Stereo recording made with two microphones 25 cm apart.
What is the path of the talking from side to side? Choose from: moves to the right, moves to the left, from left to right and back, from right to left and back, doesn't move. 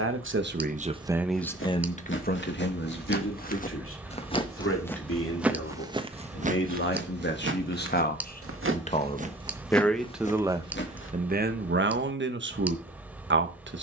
from right to left and back.